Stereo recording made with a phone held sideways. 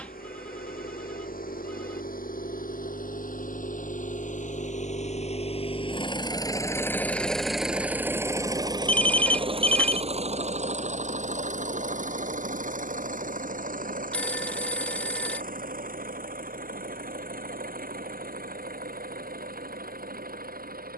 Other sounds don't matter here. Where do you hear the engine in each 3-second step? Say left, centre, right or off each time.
left, left, centre, right, right, right, right.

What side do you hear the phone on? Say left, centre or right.
centre.